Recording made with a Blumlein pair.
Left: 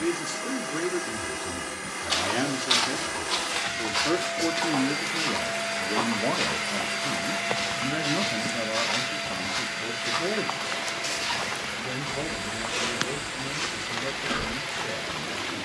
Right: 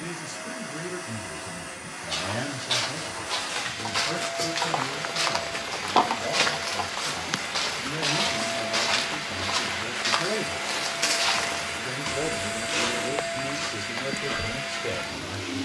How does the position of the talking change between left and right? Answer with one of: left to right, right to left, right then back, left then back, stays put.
left to right.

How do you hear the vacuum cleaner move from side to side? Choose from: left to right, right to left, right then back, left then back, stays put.
left to right.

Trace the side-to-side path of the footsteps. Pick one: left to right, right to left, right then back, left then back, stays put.
right then back.